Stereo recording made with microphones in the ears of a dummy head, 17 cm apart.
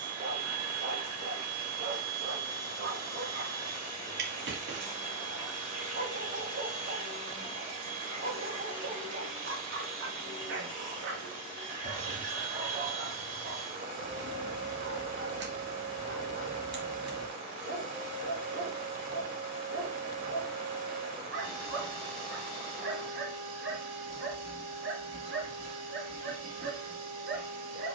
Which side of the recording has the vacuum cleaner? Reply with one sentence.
You can hear the vacuum cleaner on the right.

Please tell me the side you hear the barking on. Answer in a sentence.
You can hear the barking on the right.